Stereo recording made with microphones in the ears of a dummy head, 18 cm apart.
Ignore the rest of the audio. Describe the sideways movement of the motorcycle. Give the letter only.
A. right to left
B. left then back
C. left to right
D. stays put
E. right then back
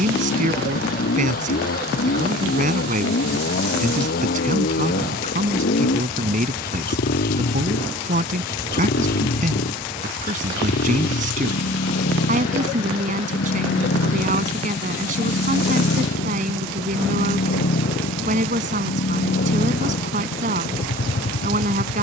D.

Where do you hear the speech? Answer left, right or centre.
right.